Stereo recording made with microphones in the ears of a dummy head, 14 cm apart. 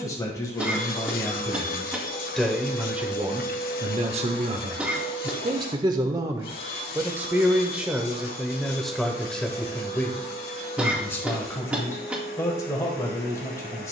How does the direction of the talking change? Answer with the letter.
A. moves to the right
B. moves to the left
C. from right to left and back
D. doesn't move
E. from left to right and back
E.